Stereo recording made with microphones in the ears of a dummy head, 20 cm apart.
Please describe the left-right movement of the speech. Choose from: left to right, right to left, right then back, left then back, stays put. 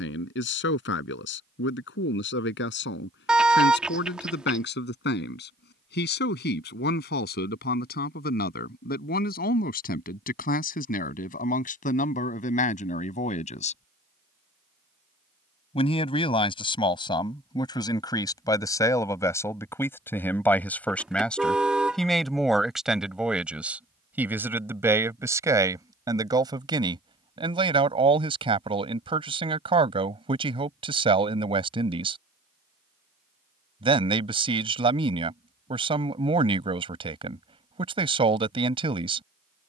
left to right.